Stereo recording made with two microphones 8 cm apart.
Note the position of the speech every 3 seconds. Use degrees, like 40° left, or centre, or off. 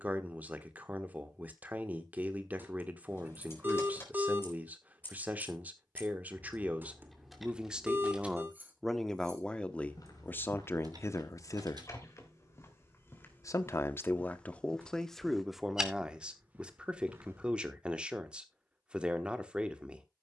20° right, 20° right, 10° right, 30° left, 20° left, 10° right, 10° right.